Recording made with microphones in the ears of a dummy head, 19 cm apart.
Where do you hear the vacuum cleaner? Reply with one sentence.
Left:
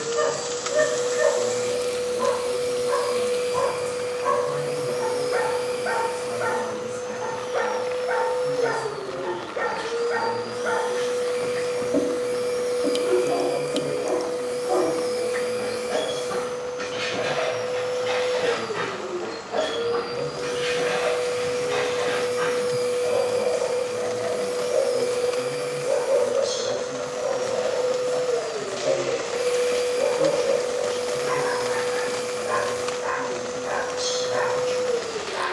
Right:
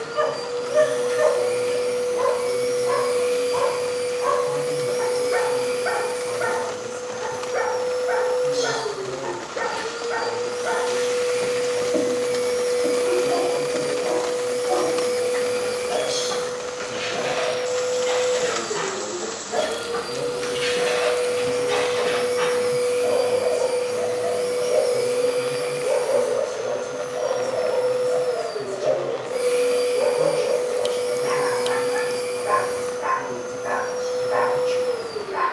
You can hear the vacuum cleaner on the right.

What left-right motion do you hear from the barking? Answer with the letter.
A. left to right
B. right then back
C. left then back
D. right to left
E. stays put
C.